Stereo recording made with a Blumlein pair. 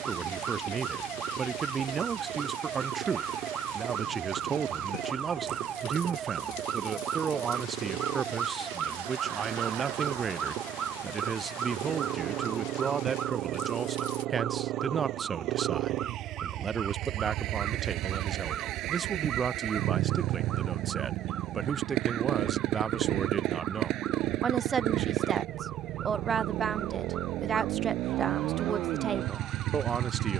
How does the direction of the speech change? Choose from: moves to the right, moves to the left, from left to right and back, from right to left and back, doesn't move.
doesn't move.